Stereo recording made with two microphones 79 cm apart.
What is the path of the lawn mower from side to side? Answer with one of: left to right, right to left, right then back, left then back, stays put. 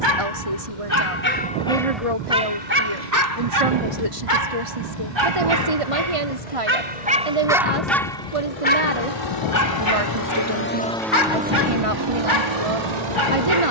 left to right.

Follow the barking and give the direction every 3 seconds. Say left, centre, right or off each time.
centre, right, centre, left, left.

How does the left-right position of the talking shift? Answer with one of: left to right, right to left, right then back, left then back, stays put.
stays put.